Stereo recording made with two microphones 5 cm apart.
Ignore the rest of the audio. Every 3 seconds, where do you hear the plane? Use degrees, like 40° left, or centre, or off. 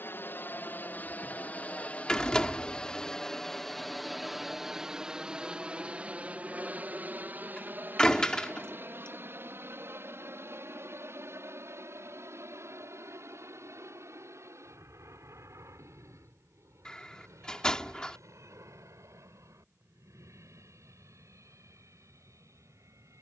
30° left, 10° right, 30° right, 50° right, 60° right, 60° right, 60° right, 60° right.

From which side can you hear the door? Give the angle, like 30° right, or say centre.
20° left.